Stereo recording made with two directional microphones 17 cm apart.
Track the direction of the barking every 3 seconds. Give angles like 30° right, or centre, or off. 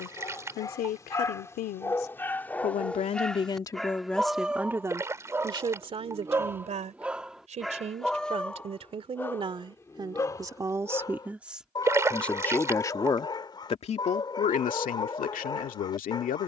20° left, centre, centre, 20° left, 30° left, 30° left.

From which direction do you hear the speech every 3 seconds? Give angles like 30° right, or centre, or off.
60° left, centre, 40° right, 20° right, 30° left, 50° left.